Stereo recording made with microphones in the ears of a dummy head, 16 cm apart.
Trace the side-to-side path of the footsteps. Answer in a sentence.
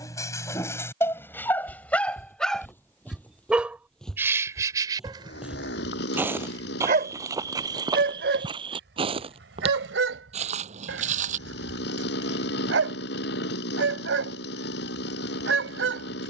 In this clip you hear the footsteps travel towards the right.